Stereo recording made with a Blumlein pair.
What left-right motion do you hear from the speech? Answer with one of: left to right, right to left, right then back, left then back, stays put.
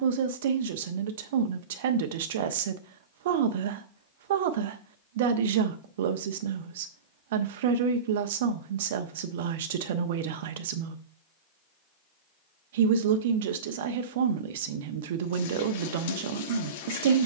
stays put.